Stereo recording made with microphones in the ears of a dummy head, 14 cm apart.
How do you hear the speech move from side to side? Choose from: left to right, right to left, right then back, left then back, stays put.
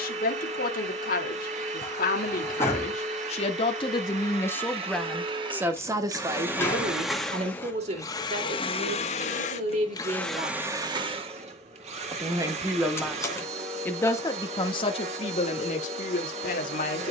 right then back.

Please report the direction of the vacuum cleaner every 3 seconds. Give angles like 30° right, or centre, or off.
40° right, 40° right, 10° left, centre, 40° right, 40° right.